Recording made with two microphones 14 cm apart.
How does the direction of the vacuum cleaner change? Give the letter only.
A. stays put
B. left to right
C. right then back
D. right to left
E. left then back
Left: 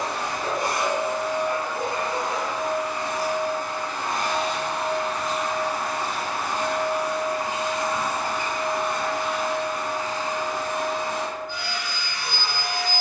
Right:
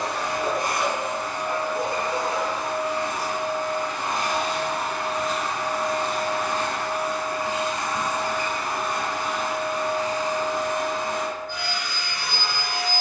E.